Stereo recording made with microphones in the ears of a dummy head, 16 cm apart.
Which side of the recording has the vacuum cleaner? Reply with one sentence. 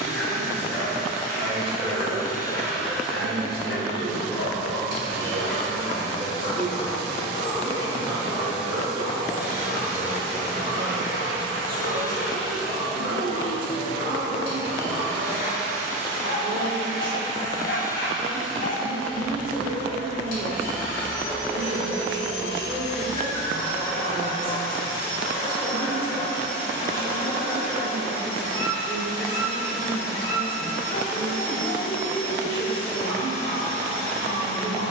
You can hear the vacuum cleaner on the left.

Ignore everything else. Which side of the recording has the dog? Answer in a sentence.
You can hear the dog on the left.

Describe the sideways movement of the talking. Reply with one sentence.
In this clip you hear the talking stay in one place.